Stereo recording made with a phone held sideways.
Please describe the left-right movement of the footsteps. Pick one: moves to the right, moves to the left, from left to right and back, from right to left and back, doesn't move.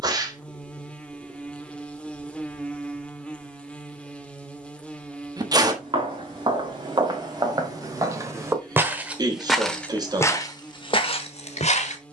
moves to the left.